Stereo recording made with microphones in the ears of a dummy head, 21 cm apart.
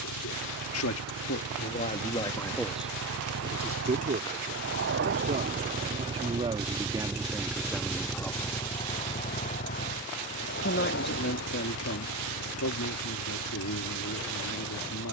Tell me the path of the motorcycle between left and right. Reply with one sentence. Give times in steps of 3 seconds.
In this clip you hear the motorcycle on the right from 0 s, in the centre from 6 s and on the left from 9 s.